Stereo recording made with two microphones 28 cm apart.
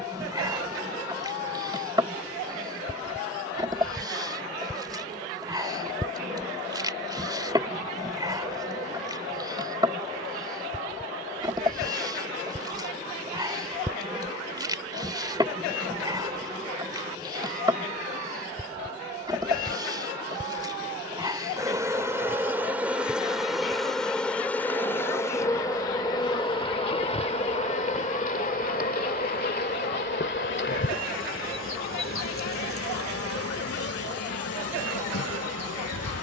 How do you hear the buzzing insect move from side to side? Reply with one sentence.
You can hear the buzzing insect move to the left.